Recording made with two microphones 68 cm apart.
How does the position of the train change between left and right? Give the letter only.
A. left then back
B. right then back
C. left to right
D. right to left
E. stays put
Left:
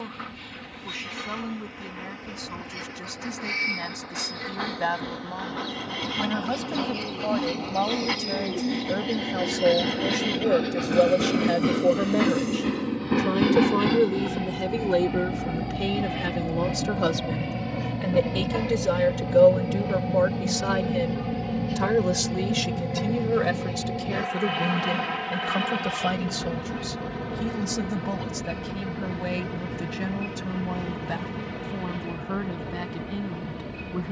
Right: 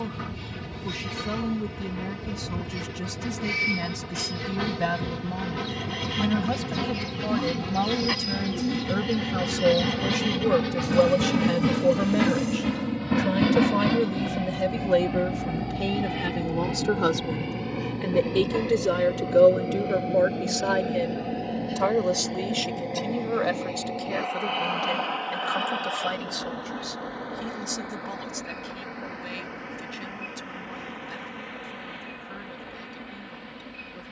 D.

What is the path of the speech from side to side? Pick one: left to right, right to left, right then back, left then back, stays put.
right to left.